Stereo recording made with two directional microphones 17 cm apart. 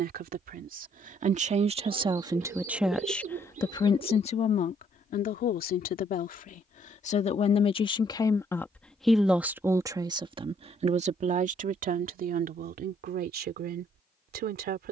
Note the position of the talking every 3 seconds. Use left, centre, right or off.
right, left, left, right, right.